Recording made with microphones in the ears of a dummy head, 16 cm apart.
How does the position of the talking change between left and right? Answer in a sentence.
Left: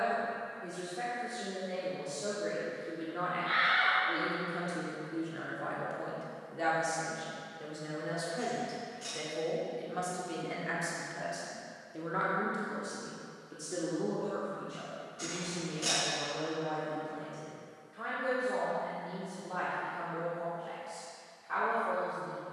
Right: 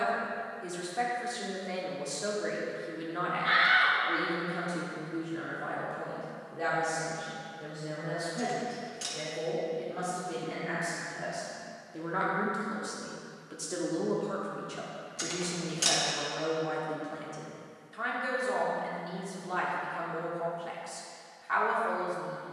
In this clip you hear the talking go left and come back.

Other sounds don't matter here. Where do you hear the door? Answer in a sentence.
You can hear the door on the right.